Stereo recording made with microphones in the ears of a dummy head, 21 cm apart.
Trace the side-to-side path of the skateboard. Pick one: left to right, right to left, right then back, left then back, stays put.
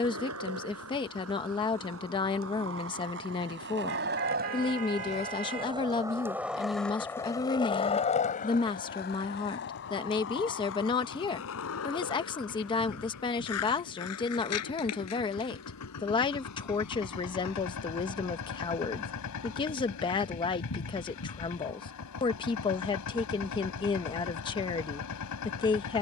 right to left.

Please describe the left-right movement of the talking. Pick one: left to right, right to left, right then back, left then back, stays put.
stays put.